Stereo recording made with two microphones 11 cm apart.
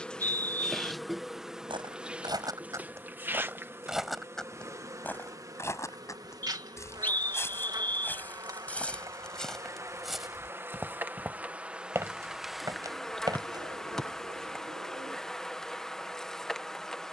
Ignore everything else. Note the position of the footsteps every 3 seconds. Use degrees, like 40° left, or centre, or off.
40° right, 10° left, 20° left, centre, 30° right, off.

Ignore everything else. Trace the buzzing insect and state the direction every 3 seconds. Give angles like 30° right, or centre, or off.
centre, 20° right, 30° right, 20° right, centre, centre.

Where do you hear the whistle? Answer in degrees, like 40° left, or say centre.
20° left.